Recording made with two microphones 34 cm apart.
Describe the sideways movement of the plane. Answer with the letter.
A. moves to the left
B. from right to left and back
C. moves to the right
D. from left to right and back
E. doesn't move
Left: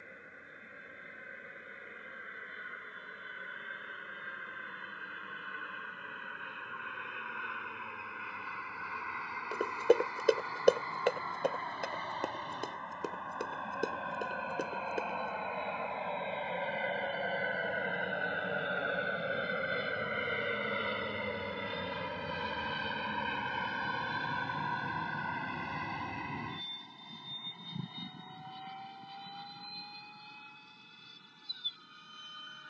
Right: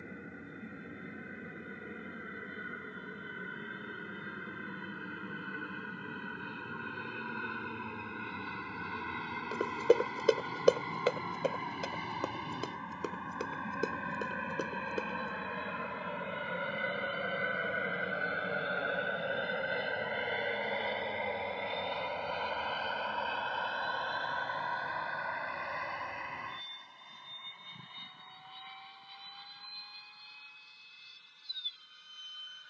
A.